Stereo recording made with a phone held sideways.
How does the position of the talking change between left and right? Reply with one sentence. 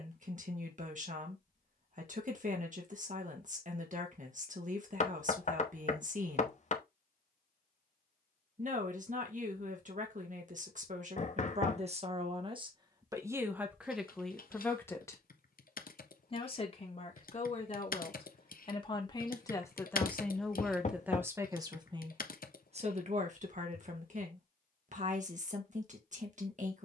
You can hear the talking go left and come back.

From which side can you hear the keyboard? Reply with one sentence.
You can hear the keyboard on the left.